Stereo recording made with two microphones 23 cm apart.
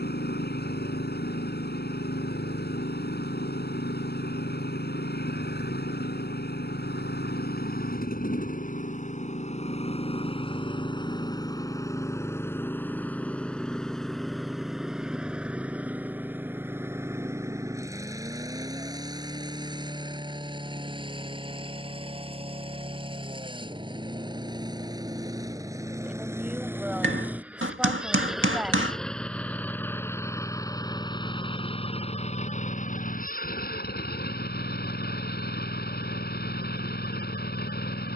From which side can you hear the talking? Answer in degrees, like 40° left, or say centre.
10° right.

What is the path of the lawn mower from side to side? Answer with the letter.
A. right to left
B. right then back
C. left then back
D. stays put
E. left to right
B.